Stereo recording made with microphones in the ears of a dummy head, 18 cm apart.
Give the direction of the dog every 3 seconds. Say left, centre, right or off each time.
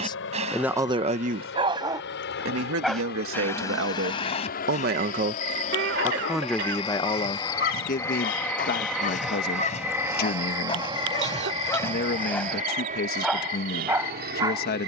right, left, left, left, centre.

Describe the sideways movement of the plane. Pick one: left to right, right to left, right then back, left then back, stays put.
left to right.